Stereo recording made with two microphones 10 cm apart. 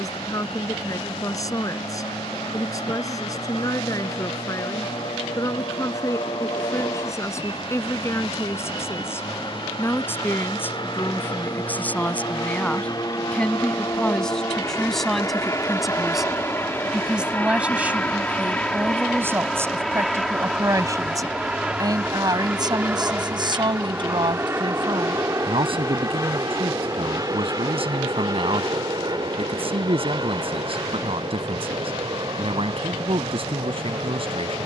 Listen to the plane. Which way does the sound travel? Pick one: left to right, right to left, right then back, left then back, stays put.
left to right.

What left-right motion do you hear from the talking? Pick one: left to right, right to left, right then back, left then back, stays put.
left to right.